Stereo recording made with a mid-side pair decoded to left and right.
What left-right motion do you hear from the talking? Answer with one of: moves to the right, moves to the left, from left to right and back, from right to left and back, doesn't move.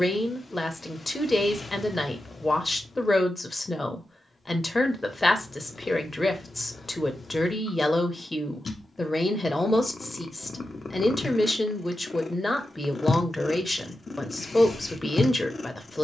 doesn't move.